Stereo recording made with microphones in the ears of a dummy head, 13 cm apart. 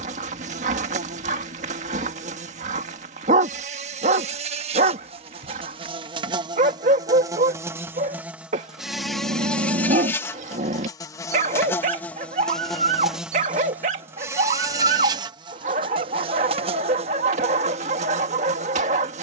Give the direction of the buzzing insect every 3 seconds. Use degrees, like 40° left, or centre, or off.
50° right, 50° right, 20° right, 10° left, 10° right, 40° right, 50° right.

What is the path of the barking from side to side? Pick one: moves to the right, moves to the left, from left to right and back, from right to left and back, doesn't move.
doesn't move.